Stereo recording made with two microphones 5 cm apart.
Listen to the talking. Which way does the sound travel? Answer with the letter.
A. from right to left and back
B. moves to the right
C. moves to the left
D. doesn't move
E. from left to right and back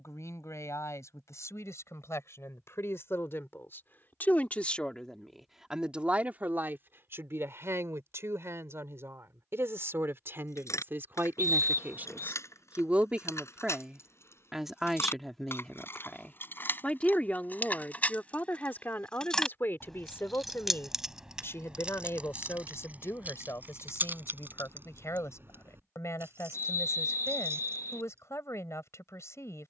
E.